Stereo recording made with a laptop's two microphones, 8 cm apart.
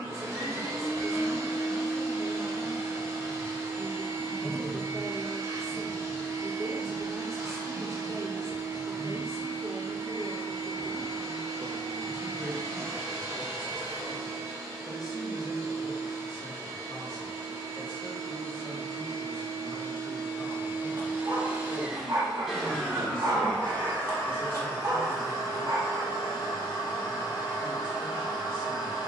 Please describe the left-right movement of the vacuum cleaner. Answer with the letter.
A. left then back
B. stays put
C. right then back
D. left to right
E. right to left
E.